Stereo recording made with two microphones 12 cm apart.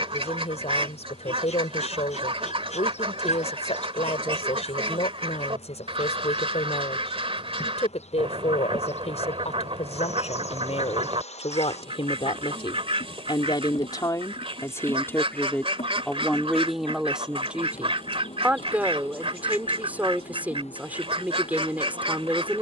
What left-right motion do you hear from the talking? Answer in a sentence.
You can hear the talking go from the left side to the right.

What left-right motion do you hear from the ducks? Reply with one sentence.
You can hear the ducks stay put.